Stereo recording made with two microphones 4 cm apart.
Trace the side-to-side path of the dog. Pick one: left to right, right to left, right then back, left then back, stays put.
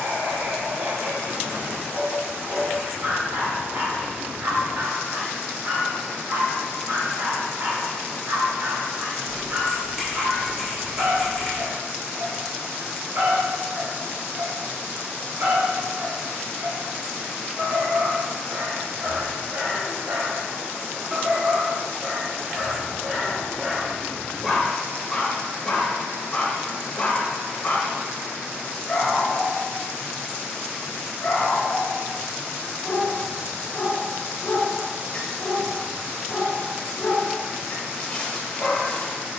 right to left.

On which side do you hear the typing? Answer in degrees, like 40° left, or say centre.
centre.